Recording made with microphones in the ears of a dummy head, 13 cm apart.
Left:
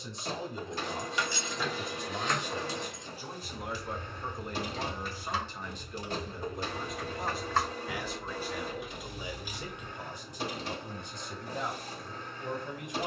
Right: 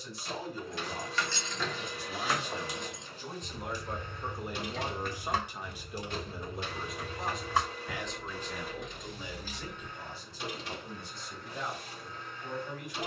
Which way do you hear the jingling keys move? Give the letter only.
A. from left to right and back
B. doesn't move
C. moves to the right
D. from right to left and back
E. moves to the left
A.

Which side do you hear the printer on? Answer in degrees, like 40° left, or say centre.
30° left.